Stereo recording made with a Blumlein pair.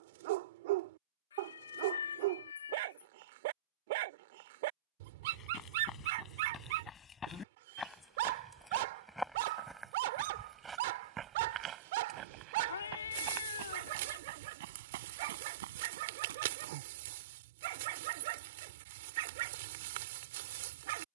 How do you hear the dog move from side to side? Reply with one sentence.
In this clip you hear the dog stay in one place.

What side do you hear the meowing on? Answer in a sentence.
In this clip you hear the meowing on the left.